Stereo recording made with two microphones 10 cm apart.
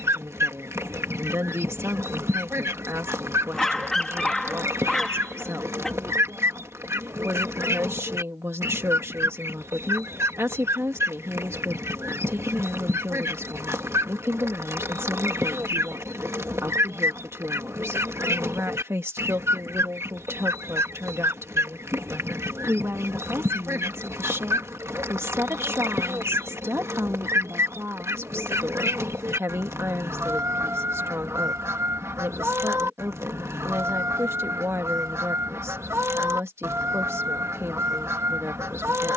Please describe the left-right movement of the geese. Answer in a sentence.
In this clip you hear the geese stay in one place.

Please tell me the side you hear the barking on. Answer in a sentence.
You can hear the barking in the centre.